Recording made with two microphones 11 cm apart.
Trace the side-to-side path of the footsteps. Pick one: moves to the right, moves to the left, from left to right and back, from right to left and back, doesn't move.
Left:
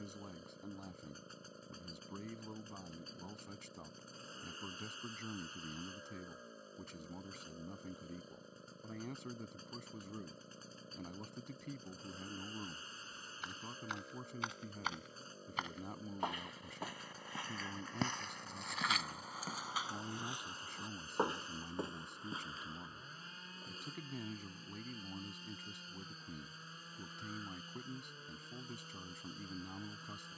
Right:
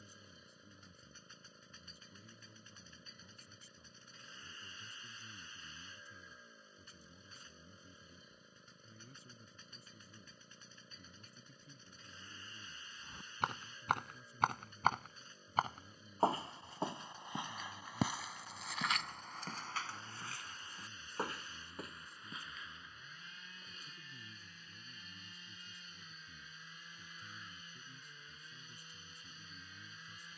moves to the left.